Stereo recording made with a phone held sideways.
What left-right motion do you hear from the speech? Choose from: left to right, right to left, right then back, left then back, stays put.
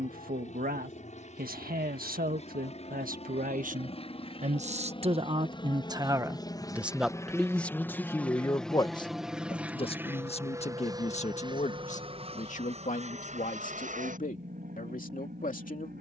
right to left.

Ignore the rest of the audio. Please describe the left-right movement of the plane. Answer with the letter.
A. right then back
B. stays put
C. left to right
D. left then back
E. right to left
C.